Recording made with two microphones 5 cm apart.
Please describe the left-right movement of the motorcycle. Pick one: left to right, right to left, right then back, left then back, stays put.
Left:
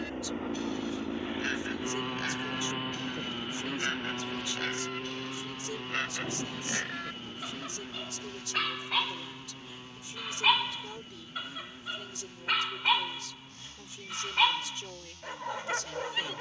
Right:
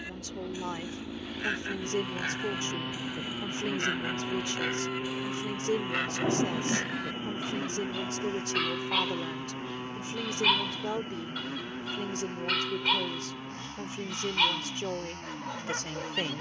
left to right.